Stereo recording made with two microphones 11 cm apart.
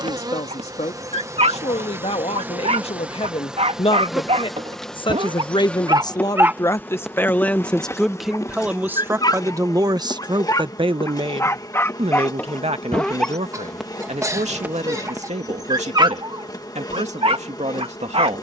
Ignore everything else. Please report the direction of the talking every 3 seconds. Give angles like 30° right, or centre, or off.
60° left, 50° left, 10° left, 40° right, 60° right, 70° right.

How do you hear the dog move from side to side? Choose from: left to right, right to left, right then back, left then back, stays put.
left then back.